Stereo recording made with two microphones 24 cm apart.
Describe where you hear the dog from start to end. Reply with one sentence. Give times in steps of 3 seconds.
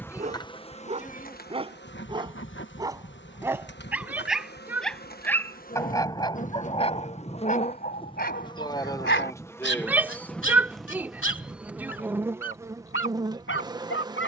In this clip you hear the dog on the right from 0 s, in the centre from 3 s and on the left from 6 s.